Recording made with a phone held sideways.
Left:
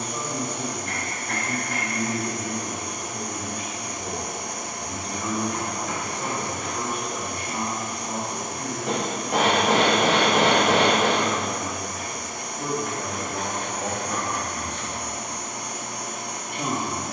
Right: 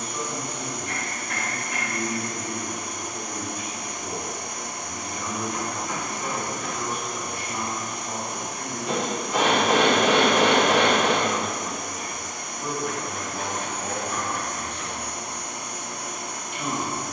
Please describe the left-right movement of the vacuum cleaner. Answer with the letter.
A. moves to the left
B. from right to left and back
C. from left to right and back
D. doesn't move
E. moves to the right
D.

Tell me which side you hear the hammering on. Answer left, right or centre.
left.